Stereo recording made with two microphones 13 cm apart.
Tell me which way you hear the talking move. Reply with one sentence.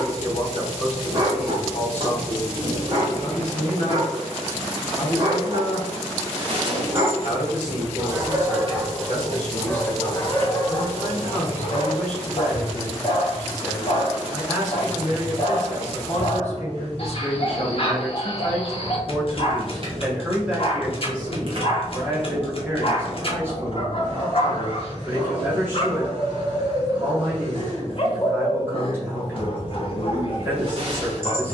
In this clip you hear the talking travel towards the right.